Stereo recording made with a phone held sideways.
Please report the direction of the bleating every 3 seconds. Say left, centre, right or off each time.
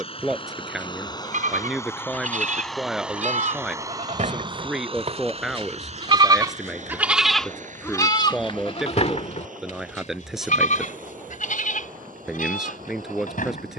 right, right, centre, left, left.